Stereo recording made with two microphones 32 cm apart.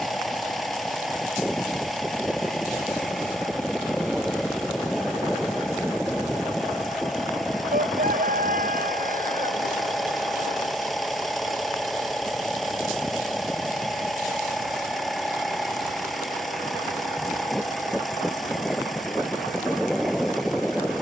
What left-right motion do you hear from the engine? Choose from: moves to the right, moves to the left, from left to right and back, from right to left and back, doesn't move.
doesn't move.